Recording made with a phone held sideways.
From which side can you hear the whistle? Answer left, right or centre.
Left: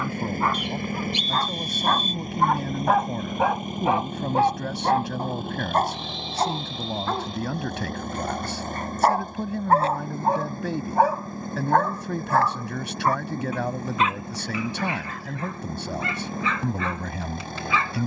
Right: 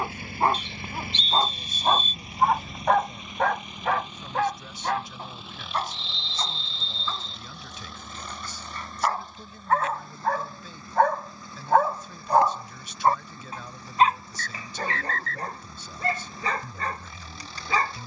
centre.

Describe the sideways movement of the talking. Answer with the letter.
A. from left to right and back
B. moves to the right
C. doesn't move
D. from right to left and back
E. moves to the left
C.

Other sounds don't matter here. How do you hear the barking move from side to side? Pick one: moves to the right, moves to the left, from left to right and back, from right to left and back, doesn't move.
from right to left and back.